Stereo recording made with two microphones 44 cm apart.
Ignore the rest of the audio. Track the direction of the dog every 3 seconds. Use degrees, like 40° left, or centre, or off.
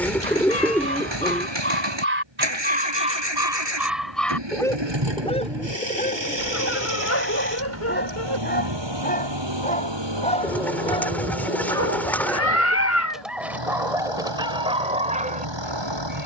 20° right, centre, 20° left, 10° left, centre, 20° right.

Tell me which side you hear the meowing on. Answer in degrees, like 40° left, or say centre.
30° left.